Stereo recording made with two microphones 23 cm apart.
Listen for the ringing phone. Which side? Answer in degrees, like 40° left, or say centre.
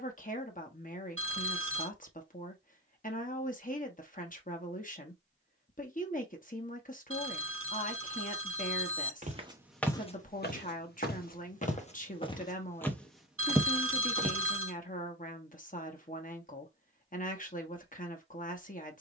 80° right.